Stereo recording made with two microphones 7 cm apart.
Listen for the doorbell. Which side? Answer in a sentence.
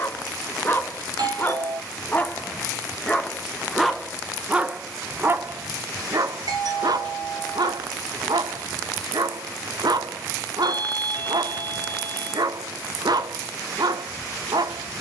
In this clip you hear the doorbell on the right.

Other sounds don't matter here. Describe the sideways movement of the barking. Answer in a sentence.
You can hear the barking move to the right.